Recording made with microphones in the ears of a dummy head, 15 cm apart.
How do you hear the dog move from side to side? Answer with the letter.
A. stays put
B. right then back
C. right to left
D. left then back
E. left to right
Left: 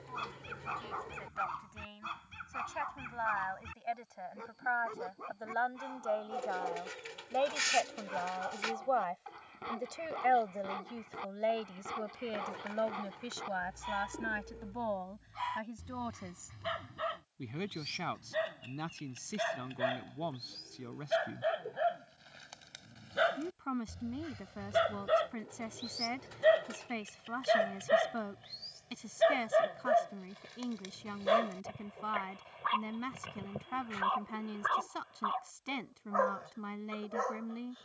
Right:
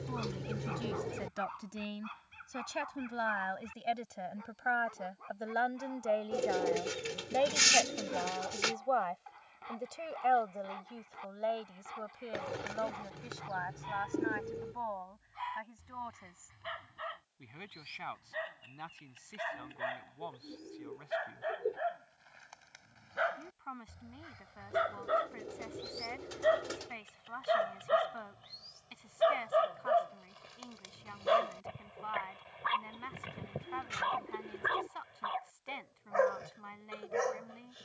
E.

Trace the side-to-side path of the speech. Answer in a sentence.
In this clip you hear the speech go from the right side to the left.